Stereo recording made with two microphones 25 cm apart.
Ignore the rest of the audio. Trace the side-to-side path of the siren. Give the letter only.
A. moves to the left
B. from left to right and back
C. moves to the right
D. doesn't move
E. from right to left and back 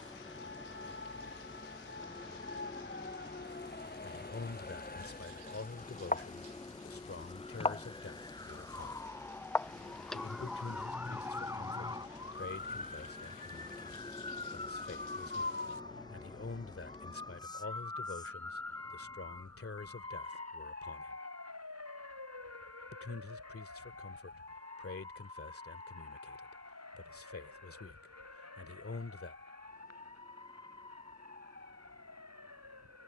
C.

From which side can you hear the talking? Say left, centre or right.
left.